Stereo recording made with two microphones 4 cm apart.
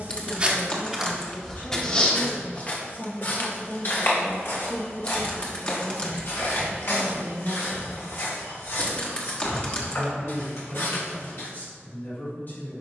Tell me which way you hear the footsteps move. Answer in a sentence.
You can hear the footsteps travel towards the left.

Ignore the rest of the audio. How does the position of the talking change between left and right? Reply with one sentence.
You can hear the talking go right and come back.